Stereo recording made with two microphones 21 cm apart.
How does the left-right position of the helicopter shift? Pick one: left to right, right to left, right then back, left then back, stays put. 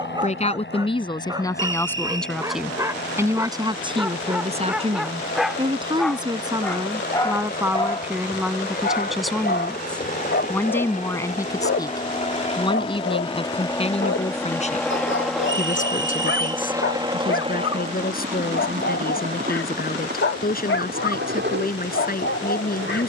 left to right.